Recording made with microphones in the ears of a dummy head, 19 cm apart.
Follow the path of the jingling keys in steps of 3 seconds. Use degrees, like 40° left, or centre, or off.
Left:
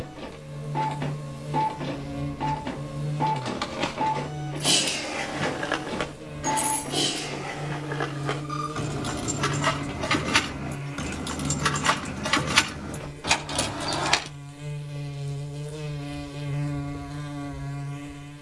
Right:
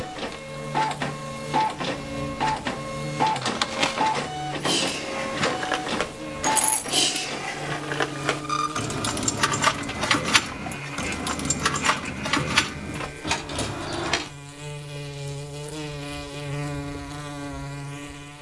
off, 10° left, 60° right, 30° right, 20° left, off.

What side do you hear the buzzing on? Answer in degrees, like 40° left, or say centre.
30° right.